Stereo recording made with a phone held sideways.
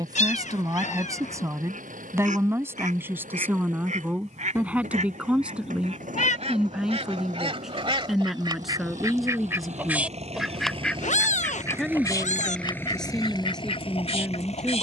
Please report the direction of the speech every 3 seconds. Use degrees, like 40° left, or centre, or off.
20° right, 10° right, centre, centre, 10° left.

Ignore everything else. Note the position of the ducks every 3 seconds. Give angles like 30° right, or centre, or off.
70° right, 60° right, 40° right, centre, 40° left.